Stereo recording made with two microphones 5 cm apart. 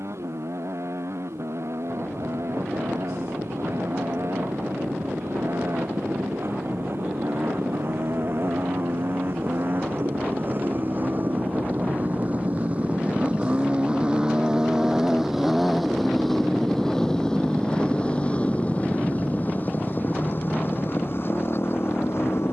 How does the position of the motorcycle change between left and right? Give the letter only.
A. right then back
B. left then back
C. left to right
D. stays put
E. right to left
E.